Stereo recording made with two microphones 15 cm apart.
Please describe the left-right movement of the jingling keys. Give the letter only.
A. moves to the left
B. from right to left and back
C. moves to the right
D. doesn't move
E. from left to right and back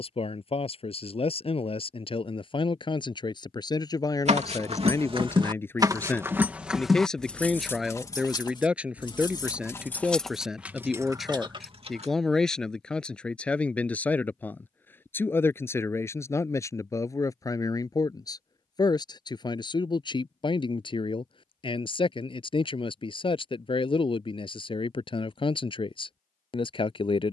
B.